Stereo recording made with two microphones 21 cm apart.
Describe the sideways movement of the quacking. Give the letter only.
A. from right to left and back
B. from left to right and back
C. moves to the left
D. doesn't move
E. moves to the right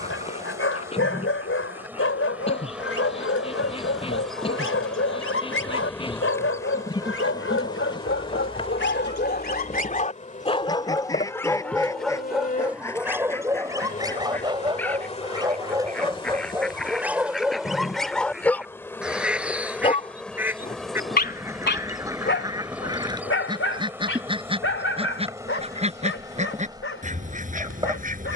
E.